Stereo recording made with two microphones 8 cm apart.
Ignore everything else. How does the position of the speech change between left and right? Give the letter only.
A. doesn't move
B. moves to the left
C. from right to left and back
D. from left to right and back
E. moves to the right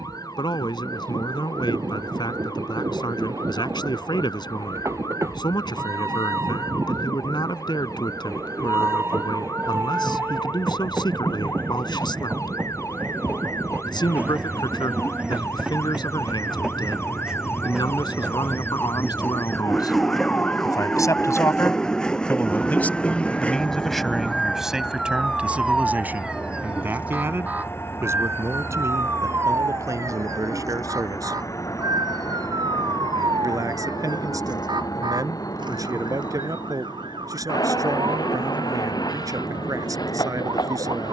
E.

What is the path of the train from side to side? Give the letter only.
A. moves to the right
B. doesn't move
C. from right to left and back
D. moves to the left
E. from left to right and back
D.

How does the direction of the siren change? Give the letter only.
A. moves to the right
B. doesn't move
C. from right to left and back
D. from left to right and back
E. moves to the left
A.